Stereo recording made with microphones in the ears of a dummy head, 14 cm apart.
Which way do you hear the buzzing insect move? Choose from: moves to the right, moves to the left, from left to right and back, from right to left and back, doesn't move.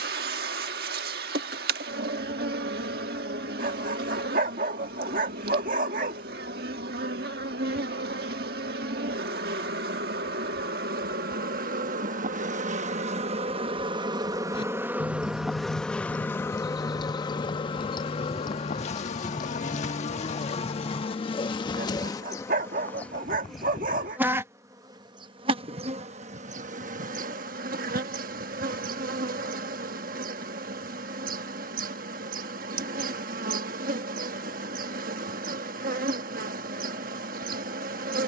from right to left and back.